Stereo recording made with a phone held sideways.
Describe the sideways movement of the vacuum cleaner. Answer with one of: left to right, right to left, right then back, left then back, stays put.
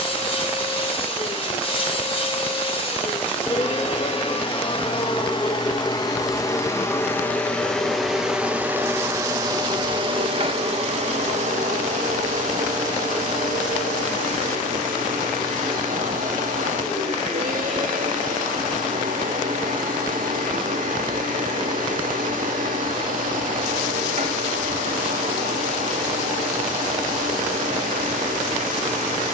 left to right.